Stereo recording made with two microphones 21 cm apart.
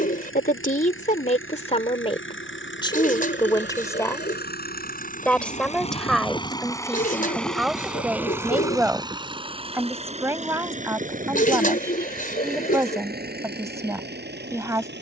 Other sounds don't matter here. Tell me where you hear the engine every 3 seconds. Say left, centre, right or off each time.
left, left, centre, right, right.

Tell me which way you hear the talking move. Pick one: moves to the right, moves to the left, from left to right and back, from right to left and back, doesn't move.
moves to the right.